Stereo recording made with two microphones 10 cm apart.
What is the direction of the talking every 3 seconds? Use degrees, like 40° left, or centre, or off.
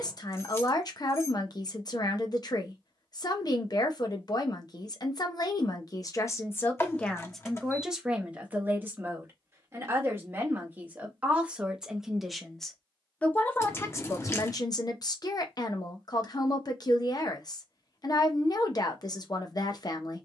50° left, 50° left, centre, 20° right, 20° left, 50° left, 50° left.